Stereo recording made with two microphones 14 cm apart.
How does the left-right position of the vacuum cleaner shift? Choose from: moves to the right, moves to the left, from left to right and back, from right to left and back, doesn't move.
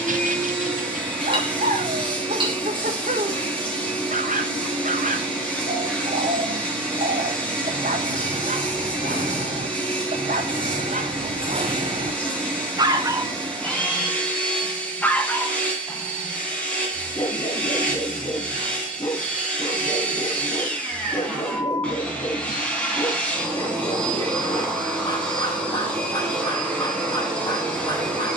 doesn't move.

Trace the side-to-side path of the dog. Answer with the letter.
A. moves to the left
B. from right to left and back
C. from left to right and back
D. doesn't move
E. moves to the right
A.